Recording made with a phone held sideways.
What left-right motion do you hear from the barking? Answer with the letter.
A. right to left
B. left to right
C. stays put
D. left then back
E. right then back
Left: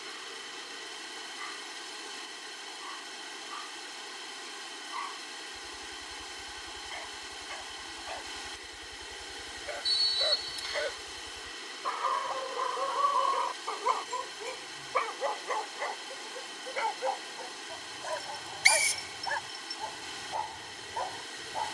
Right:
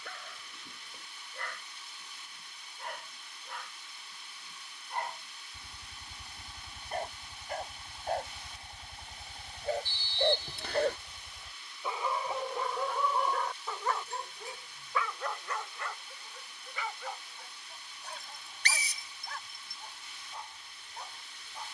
A.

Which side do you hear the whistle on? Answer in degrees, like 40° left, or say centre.
60° right.